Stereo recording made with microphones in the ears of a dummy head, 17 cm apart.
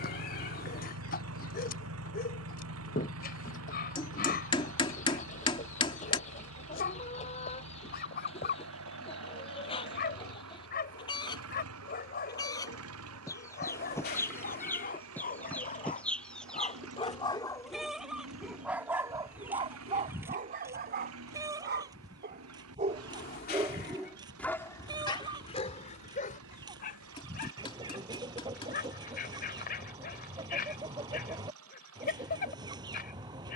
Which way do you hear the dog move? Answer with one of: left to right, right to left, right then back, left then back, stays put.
right then back.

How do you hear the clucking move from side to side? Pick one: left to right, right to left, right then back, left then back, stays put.
left to right.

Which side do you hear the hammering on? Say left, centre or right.
left.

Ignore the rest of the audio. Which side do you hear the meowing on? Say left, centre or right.
left.